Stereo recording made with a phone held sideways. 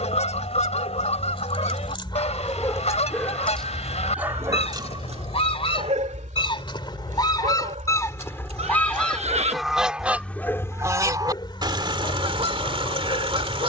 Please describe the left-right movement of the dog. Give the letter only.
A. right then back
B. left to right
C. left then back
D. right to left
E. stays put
A.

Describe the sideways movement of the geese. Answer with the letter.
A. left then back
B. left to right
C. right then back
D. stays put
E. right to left
B.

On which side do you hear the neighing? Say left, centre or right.
right.